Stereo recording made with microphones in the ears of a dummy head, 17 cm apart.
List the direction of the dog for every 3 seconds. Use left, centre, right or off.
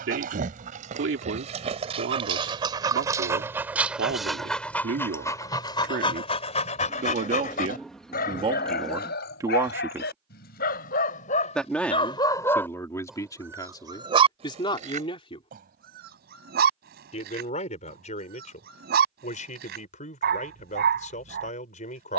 right, centre, left, left, centre, right, right, right.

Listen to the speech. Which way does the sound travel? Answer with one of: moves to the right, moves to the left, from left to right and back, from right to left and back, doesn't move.
moves to the left.